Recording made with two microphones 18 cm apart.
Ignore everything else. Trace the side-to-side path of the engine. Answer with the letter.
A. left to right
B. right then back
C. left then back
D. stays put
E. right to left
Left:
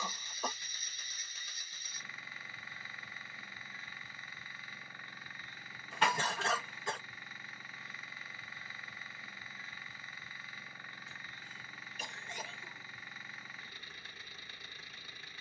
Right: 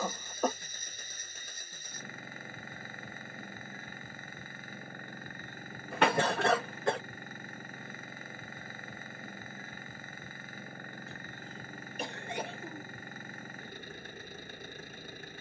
D.